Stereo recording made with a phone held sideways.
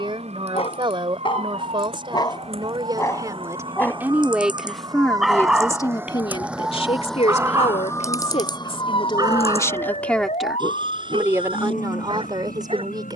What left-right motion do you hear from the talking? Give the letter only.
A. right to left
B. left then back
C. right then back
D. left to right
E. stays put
B.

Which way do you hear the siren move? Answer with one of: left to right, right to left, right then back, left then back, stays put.
right to left.